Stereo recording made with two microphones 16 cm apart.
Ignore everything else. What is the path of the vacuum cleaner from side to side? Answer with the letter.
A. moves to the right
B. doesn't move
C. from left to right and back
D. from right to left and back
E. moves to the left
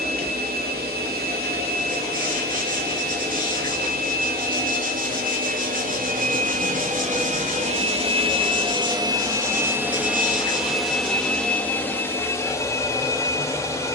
E.